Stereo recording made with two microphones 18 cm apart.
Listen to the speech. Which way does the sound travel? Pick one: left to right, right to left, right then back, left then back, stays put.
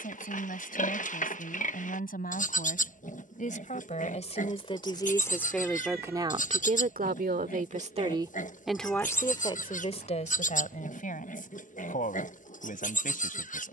right then back.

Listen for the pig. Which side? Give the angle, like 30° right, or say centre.
50° left.